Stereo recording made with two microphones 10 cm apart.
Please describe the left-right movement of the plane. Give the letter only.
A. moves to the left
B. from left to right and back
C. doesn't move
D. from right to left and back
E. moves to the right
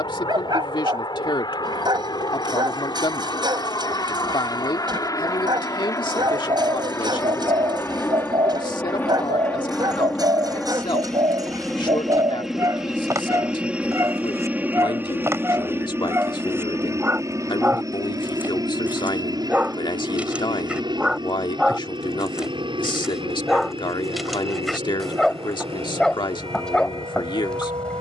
E.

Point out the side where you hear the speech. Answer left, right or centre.
left.